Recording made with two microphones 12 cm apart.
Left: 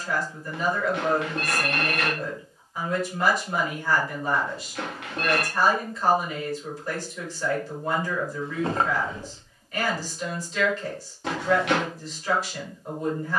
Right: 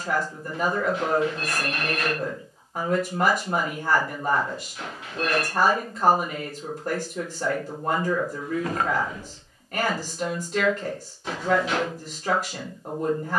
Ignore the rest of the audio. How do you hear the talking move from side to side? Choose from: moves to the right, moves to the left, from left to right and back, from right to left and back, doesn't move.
doesn't move.